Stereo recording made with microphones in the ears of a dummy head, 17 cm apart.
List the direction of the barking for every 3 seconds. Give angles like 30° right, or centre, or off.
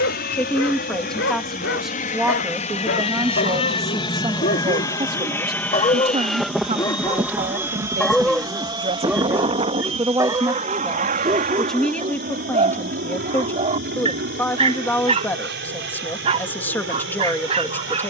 70° left, 50° left, 10° left, 20° right, 30° right, 30° right.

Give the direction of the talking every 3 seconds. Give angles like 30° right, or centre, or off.
centre, 20° right, 40° right, 10° right, 10° left, 10° left.